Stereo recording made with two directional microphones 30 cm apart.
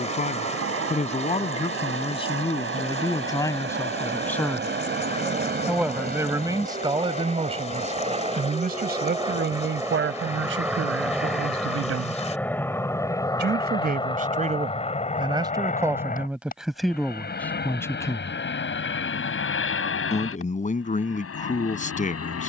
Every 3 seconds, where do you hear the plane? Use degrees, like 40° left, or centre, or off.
50° right, 40° right, 20° right, 10° right, 10° left, 30° left, 40° left, 50° left.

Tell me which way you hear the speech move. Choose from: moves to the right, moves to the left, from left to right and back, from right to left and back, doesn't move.
from left to right and back.